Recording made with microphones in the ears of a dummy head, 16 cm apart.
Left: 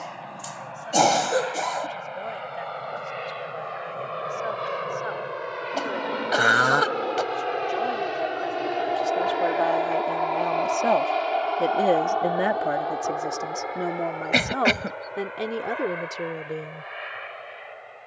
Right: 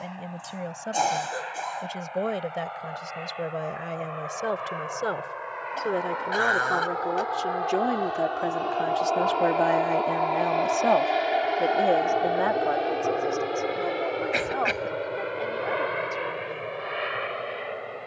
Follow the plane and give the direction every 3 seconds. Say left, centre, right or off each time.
left, left, left, centre, right, right.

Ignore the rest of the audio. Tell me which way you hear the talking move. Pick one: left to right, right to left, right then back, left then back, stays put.
right to left.